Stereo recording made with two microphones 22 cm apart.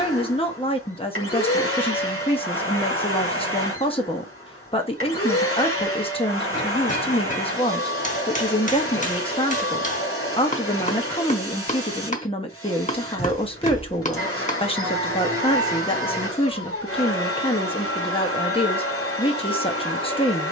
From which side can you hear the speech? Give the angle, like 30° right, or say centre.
20° left.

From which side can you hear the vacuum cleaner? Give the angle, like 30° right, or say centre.
80° left.